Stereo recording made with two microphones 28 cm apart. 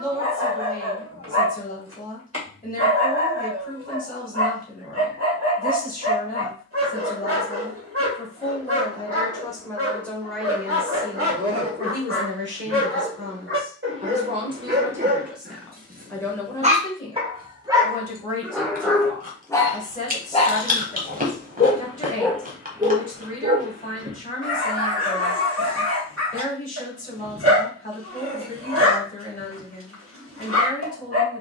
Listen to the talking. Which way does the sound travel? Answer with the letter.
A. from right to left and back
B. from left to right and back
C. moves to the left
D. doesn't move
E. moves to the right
B.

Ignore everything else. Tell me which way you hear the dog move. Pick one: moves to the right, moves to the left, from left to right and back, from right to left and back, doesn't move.
from right to left and back.